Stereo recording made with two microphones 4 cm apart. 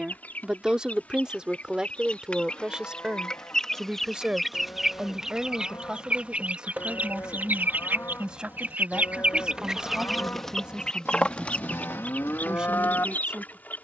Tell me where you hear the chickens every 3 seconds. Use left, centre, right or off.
left, centre, right, centre, left.